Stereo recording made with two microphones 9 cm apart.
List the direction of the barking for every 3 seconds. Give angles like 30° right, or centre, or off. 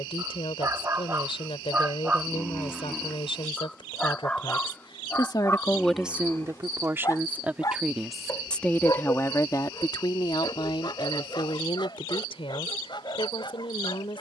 20° right, 20° left, 40° left, 50° left, 60° left.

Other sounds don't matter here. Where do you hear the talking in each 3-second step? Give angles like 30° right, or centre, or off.
80° left, 60° left, 10° right, 60° left, 80° left.